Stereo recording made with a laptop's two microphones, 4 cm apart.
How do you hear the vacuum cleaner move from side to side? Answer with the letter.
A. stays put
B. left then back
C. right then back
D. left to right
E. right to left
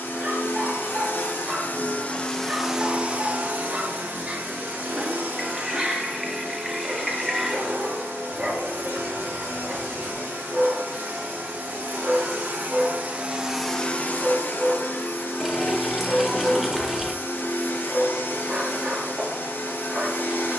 C.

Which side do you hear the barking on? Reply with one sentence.
In this clip you hear the barking on the right.